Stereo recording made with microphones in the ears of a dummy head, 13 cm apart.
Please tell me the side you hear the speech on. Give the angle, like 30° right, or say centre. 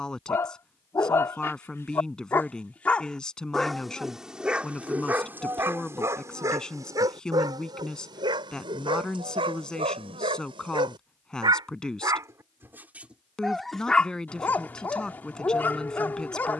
centre.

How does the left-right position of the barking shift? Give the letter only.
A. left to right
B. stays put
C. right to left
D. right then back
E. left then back
D.